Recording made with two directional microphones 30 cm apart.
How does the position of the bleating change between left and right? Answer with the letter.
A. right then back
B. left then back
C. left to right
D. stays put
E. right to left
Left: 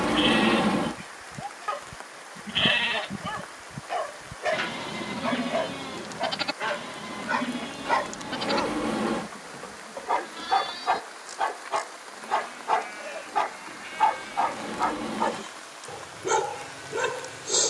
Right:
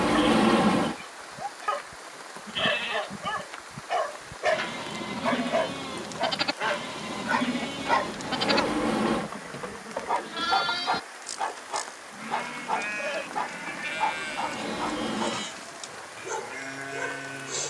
C.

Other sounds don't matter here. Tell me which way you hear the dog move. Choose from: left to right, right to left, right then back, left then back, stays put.
right to left.